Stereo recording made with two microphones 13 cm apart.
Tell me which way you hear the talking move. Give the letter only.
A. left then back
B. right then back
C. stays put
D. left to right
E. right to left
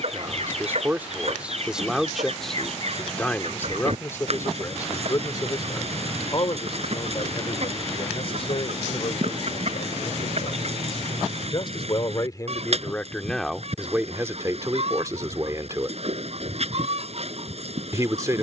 A.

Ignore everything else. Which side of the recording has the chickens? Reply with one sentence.
In this clip you hear the chickens on the right.